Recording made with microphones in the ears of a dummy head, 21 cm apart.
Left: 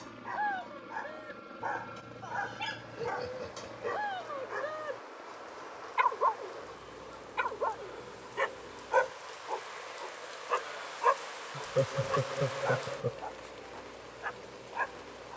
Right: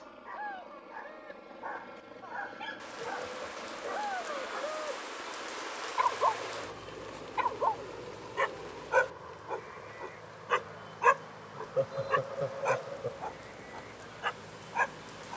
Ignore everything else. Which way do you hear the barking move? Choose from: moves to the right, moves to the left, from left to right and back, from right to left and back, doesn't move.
moves to the right.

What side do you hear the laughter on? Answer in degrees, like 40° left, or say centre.
40° left.